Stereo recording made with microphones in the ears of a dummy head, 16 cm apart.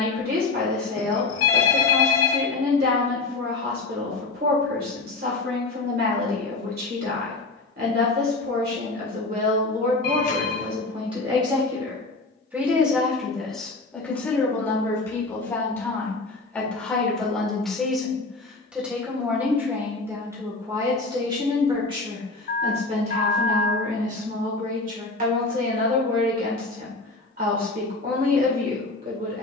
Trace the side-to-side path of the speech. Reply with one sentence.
You can hear the speech go left and come back.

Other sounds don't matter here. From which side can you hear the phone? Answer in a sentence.
In this clip you hear the phone on the left.